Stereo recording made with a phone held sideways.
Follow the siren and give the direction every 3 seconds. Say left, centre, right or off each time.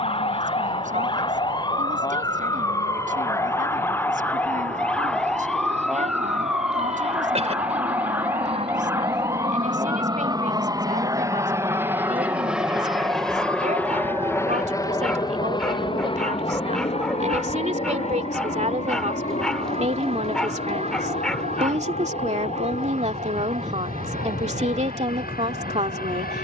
left, centre, centre, right, right, right, right, right, right.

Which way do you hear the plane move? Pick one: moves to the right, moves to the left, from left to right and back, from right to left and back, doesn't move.
moves to the left.